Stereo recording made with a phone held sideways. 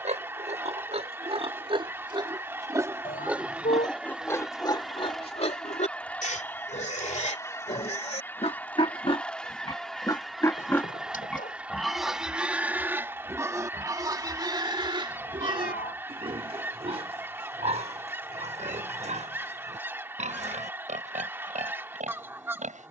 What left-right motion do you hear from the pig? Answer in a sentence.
You can hear the pig move from right to left and back again.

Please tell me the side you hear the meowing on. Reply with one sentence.
In this clip you hear the meowing on the left.